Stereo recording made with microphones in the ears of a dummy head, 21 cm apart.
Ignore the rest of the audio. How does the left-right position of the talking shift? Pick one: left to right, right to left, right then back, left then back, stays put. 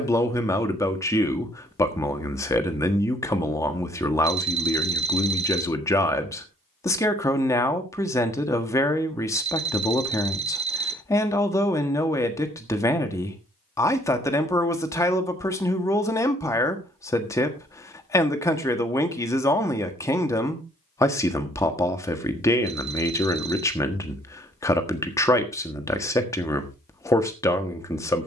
stays put.